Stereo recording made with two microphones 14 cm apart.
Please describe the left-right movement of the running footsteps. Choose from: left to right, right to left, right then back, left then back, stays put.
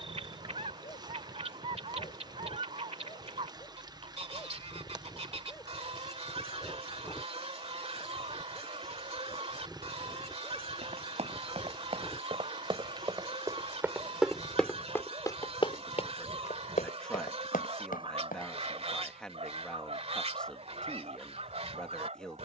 right to left.